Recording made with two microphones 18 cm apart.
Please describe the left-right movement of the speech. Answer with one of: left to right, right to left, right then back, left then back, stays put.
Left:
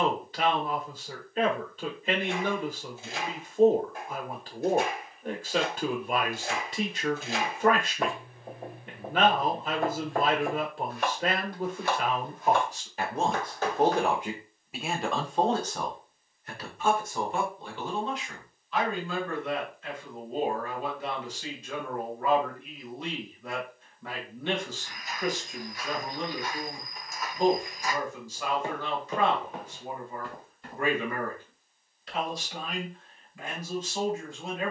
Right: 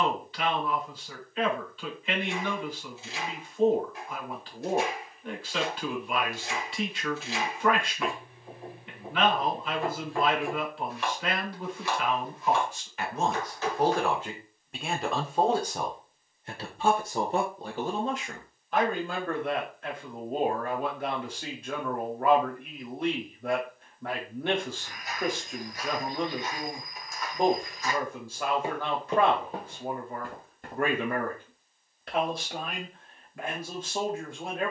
left to right.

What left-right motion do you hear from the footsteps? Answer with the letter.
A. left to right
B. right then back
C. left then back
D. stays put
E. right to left
C.